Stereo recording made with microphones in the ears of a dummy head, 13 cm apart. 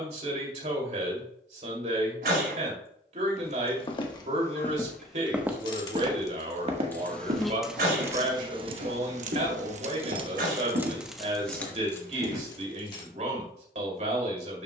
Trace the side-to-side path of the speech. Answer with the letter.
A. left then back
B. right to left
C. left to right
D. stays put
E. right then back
D.